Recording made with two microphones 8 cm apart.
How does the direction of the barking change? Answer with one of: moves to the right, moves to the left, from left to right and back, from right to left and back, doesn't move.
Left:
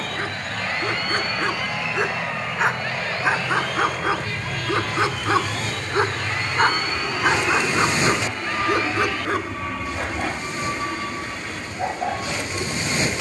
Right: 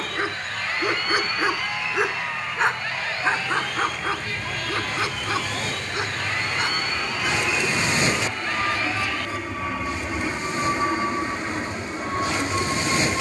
moves to the left.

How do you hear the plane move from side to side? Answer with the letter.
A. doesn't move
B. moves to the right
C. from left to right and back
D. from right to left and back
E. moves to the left
B.